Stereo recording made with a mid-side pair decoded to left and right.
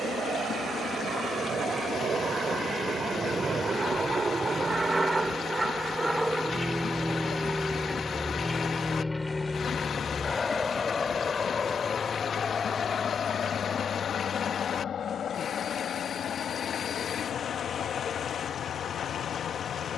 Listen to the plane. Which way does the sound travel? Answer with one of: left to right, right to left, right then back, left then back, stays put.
right to left.